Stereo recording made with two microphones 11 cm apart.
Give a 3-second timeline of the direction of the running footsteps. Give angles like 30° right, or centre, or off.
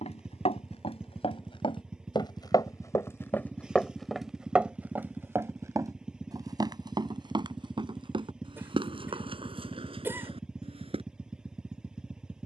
50° left, 10° right, 40° right, 50° right.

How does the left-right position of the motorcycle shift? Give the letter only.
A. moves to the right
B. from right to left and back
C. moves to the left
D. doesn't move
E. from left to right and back
D.